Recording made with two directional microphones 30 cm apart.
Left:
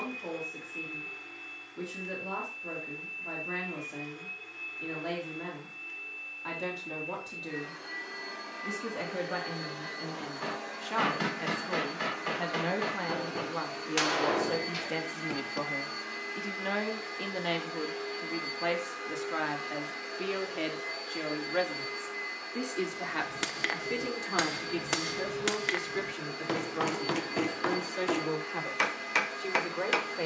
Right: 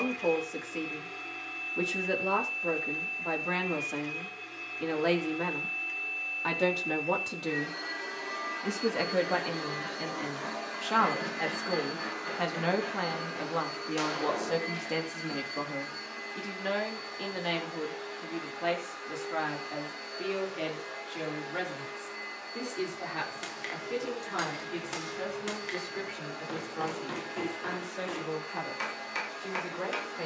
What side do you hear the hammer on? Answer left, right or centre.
left.